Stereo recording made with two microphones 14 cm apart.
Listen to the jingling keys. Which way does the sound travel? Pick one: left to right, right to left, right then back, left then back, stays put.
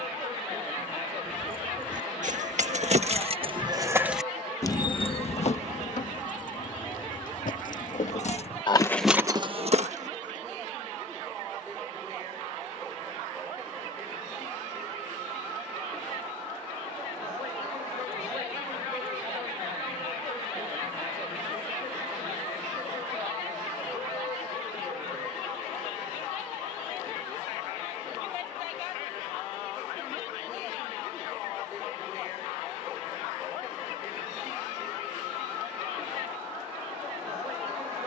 left then back.